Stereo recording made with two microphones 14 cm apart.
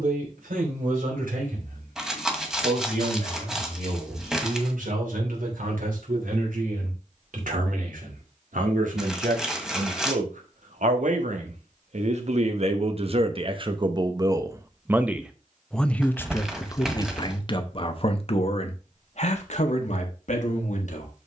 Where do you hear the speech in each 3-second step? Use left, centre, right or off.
right, right, right, right, right, left, left.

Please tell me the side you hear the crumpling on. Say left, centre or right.
centre.